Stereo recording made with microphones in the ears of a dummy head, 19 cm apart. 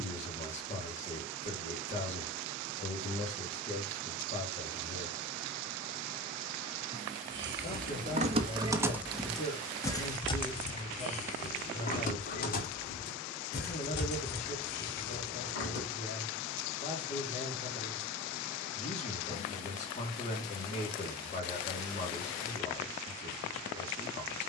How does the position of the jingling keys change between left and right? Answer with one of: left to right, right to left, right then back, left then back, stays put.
right to left.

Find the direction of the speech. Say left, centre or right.
left.